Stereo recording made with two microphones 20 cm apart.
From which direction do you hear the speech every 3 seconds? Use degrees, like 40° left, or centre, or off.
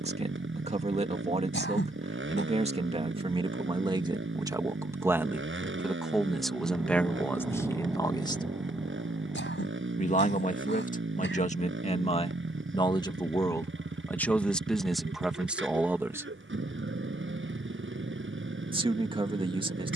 30° right, 20° right, 10° left, 40° left, 10° left, 10° right, 30° right.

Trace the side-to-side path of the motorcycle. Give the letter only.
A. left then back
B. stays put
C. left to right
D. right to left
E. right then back
B.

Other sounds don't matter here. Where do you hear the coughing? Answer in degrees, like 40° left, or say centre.
70° left.